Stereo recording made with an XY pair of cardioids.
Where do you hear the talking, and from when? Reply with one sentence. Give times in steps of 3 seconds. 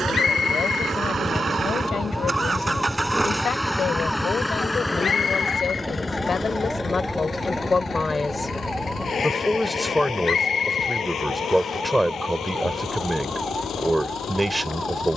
You can hear the talking on the left from 0 s and in the centre from 9 s.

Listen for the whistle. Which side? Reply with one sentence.
You can hear the whistle on the left.